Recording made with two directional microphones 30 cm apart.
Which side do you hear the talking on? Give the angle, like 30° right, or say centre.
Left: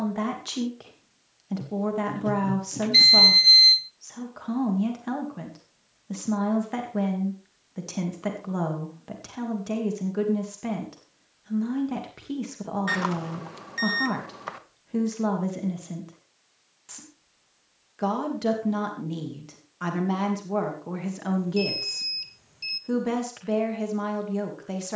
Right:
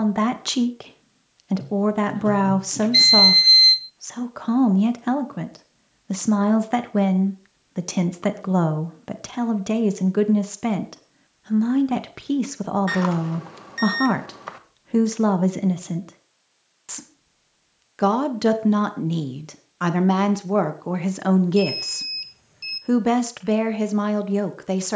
50° right.